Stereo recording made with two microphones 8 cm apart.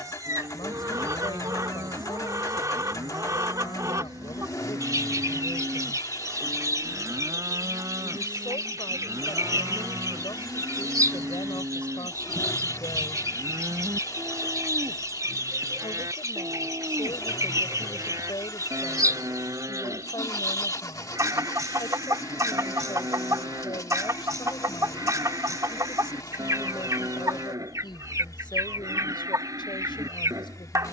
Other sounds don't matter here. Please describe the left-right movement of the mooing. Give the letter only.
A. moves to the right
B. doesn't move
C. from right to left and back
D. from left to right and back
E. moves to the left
B.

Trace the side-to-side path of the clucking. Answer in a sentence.
You can hear the clucking stay in one place.